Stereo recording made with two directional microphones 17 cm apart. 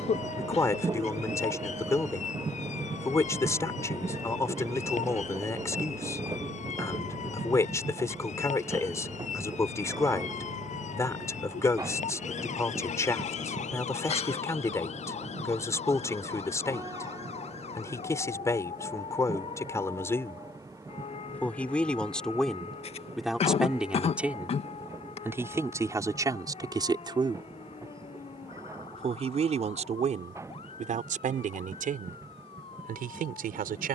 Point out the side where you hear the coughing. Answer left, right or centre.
left.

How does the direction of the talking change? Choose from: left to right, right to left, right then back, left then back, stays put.
left to right.